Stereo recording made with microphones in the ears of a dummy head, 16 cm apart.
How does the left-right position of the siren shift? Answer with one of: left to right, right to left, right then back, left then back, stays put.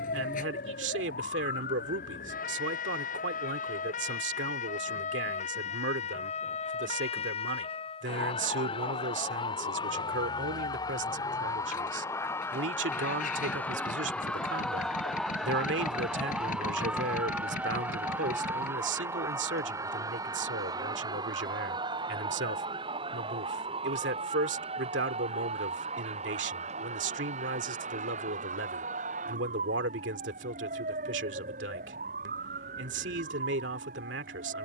left to right.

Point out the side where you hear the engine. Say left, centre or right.
left.